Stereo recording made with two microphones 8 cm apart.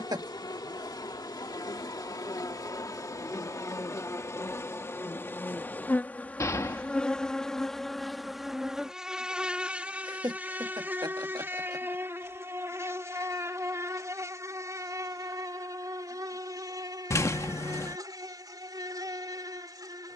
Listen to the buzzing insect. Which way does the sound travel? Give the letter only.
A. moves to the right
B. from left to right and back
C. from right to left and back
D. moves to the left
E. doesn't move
A.